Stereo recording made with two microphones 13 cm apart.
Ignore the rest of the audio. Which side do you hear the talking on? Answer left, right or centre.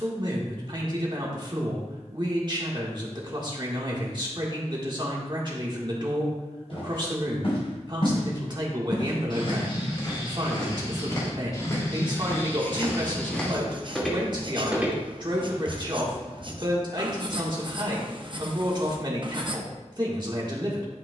right.